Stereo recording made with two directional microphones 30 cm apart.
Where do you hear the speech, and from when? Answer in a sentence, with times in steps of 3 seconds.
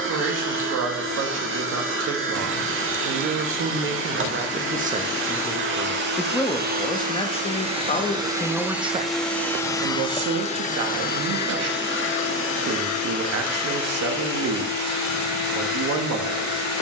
You can hear the speech on the right from 0 s, in the centre from 6 s and on the right from 9 s.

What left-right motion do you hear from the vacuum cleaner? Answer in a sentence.
You can hear the vacuum cleaner move to the left.